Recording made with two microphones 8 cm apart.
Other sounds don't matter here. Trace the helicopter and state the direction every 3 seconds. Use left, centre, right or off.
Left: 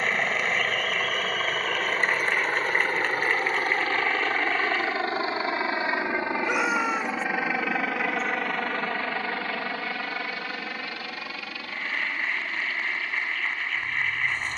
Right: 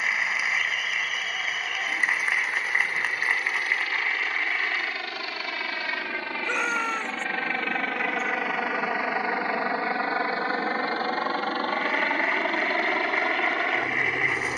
left, left, centre, right, right.